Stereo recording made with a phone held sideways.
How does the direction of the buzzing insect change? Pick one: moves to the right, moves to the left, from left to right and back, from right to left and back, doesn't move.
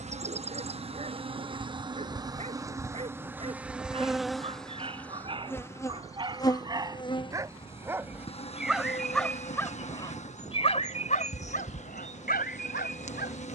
moves to the left.